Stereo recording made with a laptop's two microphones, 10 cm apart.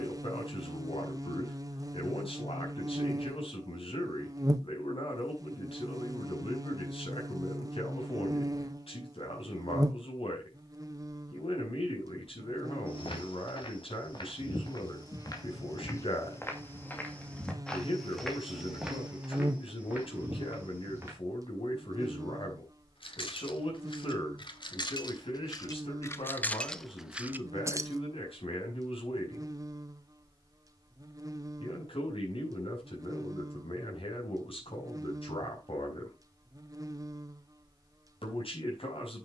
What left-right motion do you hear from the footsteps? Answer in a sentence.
In this clip you hear the footsteps move to the right.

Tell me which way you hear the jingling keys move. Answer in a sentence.
In this clip you hear the jingling keys move from left to right.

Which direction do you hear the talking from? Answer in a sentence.
You can hear the talking on the left.